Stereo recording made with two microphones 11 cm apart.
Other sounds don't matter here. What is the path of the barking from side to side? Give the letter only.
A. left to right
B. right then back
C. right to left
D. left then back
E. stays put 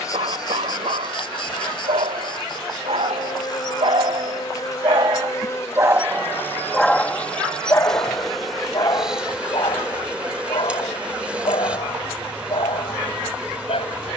C.